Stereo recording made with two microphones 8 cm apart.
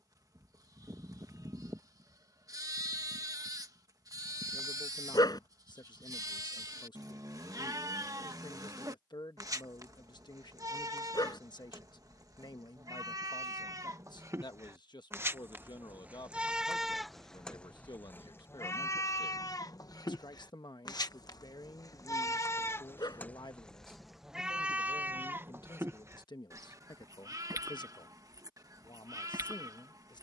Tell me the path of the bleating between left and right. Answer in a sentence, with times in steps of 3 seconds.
In this clip you hear the bleating on the right from 0 s, in the centre from 15 s, on the left from 18 s and on the right from 24 s.